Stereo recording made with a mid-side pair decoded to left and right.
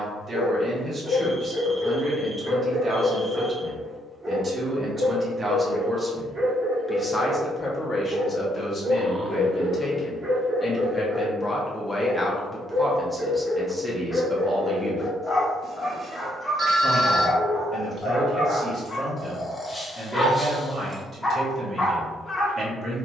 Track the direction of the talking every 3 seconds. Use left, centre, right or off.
right, right, left, left, centre, right, right, right.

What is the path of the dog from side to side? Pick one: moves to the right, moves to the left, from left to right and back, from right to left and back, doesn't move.
from left to right and back.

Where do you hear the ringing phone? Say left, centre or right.
right.